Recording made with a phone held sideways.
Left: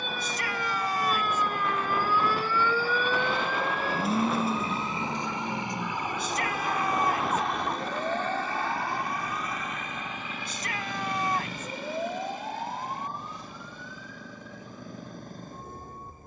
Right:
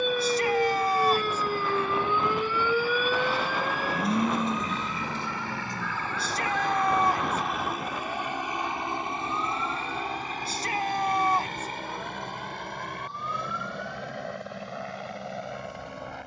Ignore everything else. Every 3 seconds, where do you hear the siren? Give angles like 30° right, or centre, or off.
30° right, 10° left, 30° left, 40° left, 50° left, 50° left.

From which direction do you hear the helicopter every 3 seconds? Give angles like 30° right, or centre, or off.
40° left, 30° left, centre, 40° right, 60° right, 70° right.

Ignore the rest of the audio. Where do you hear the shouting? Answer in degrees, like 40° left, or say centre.
30° right.